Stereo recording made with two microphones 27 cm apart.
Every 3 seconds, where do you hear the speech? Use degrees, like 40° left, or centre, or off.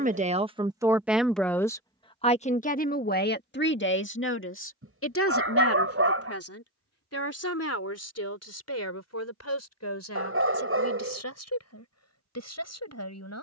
centre, 50° left, 60° left, 70° left, 70° left.